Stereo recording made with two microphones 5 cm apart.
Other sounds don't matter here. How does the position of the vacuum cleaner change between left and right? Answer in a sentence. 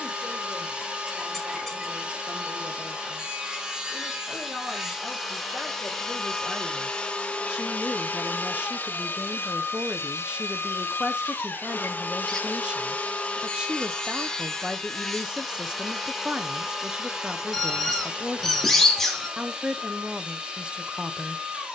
In this clip you hear the vacuum cleaner move from right to left and back again.